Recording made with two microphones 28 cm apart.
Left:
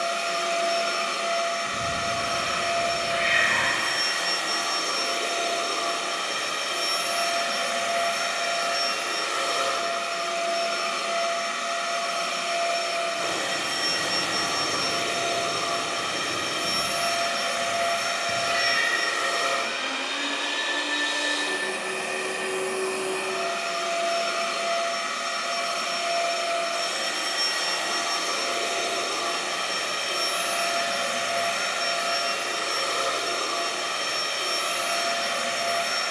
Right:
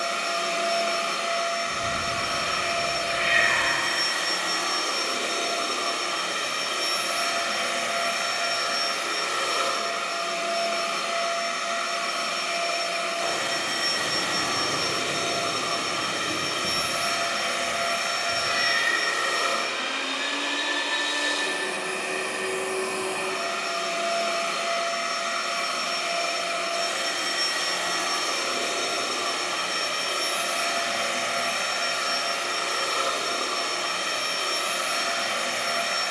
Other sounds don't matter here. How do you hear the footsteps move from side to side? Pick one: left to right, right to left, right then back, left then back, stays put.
right then back.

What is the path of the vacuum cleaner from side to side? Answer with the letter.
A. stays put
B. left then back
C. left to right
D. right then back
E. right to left
E.